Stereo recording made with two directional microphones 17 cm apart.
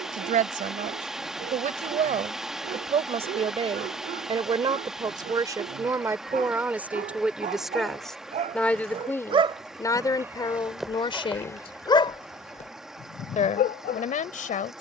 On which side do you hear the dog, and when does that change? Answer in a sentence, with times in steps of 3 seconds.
You can hear the dog on the right from 0 s, in the centre from 9 s and on the left from 12 s.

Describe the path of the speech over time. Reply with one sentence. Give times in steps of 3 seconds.
You can hear the speech on the right from 0 s, in the centre from 6 s and on the left from 9 s.